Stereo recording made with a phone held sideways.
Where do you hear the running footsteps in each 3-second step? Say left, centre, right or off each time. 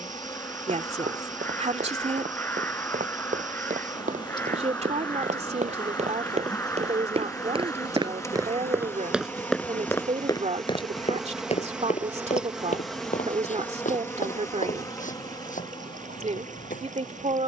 right, right, right, left, left, left.